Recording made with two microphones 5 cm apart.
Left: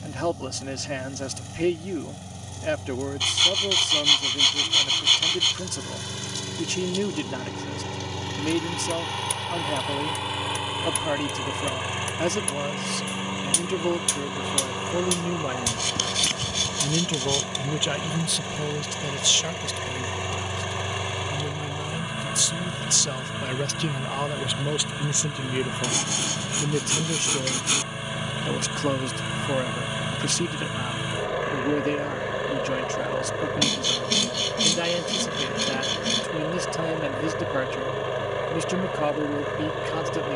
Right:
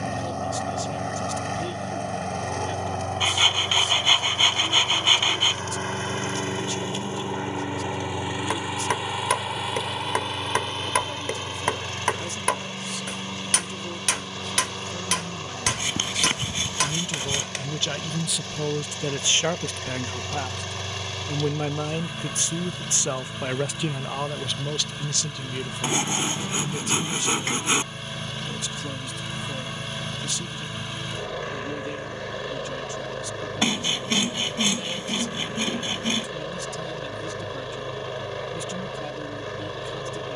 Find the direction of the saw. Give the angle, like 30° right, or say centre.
30° right.